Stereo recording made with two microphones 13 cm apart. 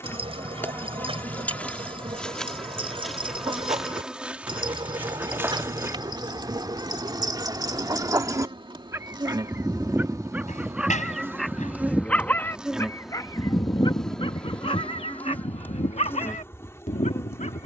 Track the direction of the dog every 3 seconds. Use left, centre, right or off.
right, right, right, centre, left, left.